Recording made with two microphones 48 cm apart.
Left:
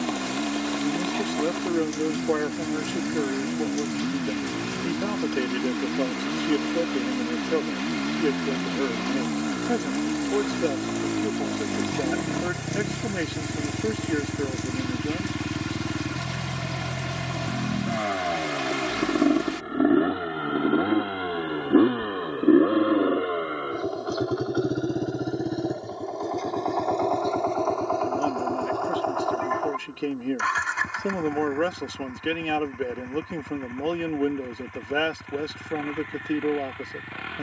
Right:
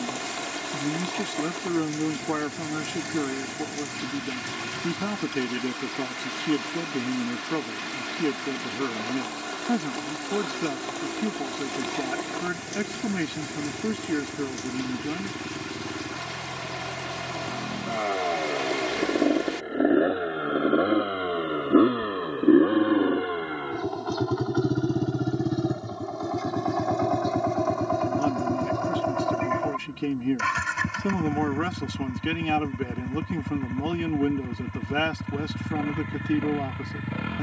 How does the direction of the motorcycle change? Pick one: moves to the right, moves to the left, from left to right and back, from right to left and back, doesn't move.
moves to the right.